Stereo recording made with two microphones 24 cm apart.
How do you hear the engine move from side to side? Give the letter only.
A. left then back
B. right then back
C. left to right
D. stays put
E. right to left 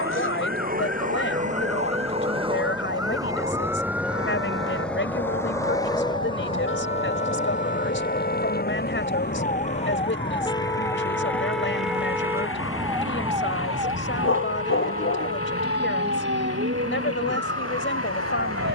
E.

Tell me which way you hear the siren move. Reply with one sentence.
In this clip you hear the siren travel towards the right.